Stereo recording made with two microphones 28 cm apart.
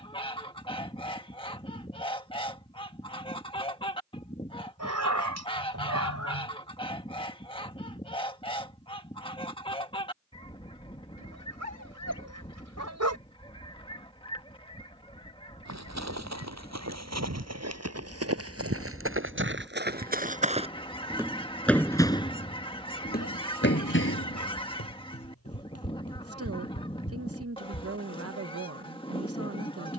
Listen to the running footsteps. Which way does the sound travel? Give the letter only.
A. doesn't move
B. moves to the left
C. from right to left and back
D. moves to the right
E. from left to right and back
B.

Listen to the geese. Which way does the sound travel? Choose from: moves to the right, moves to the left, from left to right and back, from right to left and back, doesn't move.
doesn't move.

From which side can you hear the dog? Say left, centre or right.
right.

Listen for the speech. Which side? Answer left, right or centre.
right.